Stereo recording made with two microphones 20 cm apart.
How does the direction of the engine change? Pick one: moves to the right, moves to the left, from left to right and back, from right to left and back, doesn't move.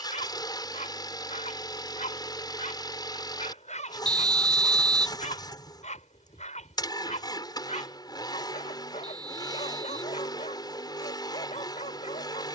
doesn't move.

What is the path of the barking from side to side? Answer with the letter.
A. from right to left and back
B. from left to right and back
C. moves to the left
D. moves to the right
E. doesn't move
E.